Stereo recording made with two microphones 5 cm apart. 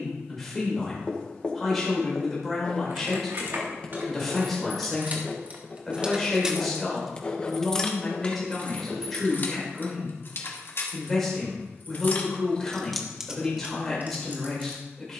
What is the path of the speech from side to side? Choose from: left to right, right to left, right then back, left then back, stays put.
stays put.